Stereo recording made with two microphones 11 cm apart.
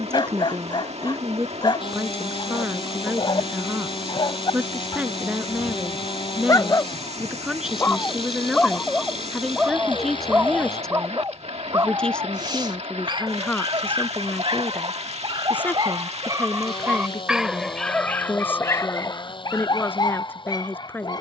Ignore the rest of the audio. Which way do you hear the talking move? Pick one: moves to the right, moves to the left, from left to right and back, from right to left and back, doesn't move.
moves to the left.